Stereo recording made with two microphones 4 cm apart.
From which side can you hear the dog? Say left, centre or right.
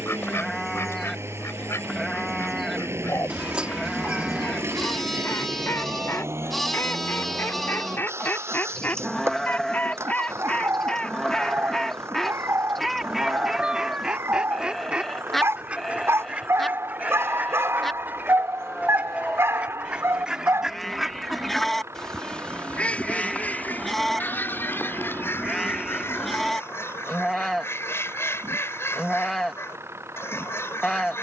right.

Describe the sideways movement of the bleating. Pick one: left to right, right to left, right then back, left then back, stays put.
stays put.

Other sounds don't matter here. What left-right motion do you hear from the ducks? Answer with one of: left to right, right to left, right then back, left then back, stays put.
right then back.